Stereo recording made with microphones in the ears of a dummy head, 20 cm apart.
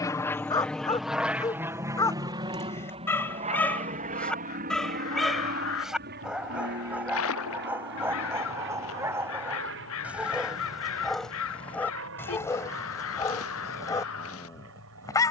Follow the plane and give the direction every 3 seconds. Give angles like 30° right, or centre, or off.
10° right, 40° right, 50° right, 50° right, 60° right.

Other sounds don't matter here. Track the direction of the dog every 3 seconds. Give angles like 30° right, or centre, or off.
20° left, centre, 10° right, centre, 10° left.